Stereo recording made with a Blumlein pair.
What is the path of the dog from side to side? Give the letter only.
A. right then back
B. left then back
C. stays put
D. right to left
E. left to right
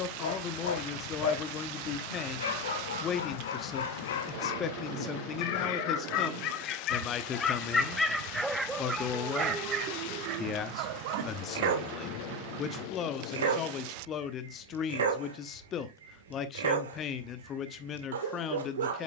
E.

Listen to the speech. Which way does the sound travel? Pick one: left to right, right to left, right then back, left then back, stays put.
stays put.